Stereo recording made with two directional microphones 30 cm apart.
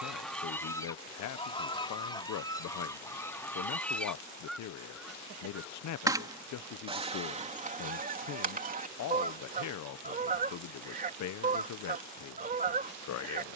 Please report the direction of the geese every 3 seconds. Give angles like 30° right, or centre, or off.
10° left, centre, 20° right, 30° right, 30° right.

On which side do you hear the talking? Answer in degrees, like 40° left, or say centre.
70° left.